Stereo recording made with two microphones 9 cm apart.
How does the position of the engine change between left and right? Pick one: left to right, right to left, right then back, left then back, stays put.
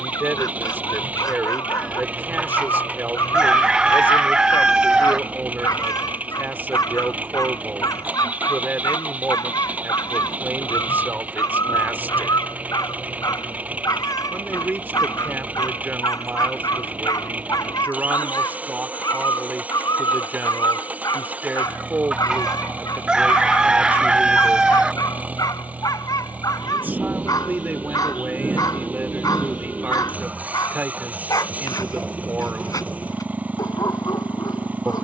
stays put.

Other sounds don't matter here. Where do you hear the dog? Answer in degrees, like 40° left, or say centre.
40° left.